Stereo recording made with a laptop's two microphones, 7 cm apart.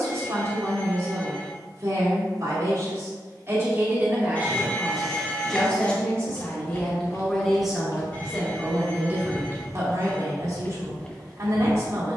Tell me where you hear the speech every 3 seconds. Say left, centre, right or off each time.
right, centre, centre, right.